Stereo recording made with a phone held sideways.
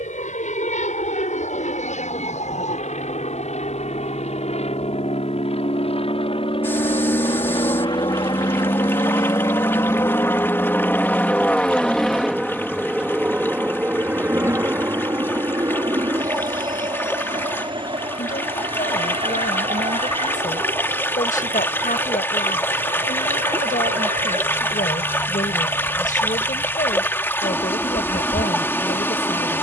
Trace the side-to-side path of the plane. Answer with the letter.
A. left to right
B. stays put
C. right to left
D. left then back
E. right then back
A.